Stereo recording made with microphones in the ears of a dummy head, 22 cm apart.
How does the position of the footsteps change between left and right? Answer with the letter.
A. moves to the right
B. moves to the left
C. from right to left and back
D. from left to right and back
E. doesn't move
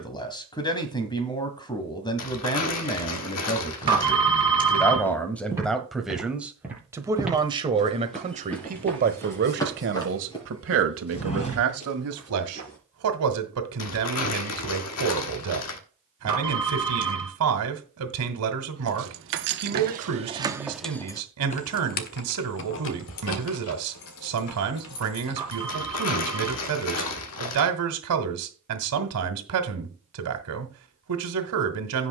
B.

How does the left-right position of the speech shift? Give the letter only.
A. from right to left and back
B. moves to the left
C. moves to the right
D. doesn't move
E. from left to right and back
C.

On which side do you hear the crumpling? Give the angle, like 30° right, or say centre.
70° left.